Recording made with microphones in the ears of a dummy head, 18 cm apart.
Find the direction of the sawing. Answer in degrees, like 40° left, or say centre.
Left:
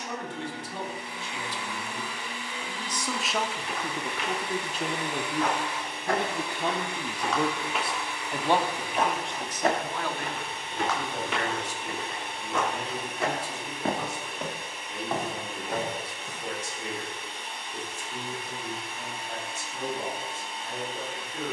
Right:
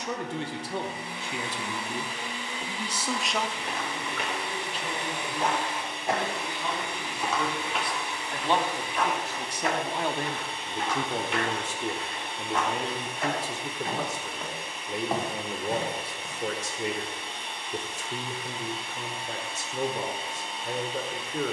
50° right.